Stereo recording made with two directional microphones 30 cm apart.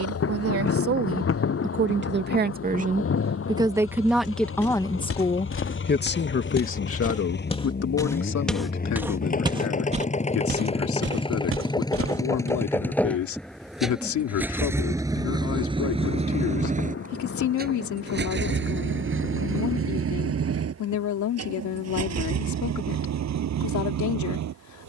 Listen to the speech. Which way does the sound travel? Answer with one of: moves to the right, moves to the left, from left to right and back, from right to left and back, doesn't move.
moves to the left.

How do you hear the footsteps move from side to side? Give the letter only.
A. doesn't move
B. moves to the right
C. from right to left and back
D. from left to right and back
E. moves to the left
B.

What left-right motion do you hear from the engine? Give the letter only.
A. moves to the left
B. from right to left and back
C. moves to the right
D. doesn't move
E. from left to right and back
C.